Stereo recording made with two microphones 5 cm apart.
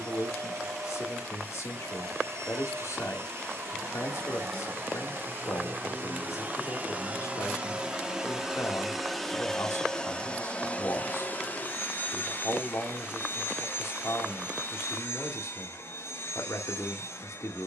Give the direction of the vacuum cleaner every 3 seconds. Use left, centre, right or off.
right, right, right, left, left, left.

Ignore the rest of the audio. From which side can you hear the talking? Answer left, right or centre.
left.